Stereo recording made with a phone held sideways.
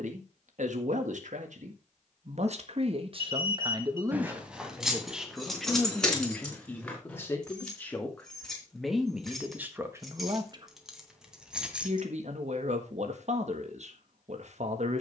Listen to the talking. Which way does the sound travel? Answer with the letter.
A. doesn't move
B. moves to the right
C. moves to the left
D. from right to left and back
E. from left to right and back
D.